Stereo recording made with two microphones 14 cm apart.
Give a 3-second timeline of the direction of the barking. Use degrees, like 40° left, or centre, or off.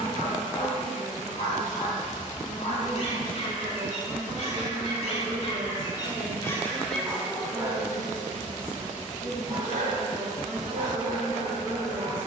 50° left, 50° left, centre, 70° right.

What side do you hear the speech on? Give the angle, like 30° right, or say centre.
60° right.